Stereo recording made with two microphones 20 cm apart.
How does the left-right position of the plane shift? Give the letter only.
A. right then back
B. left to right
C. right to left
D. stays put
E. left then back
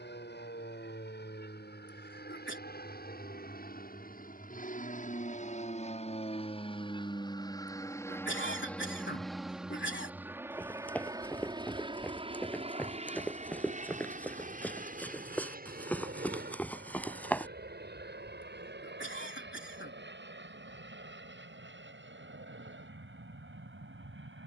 B.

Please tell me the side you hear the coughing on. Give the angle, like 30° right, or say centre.
70° left.